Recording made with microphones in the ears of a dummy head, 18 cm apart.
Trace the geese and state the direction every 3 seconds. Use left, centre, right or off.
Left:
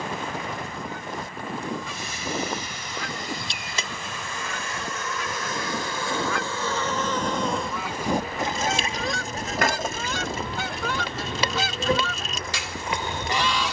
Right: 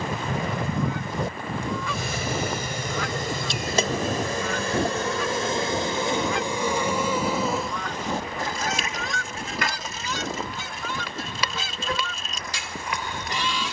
right, right, centre, left, left.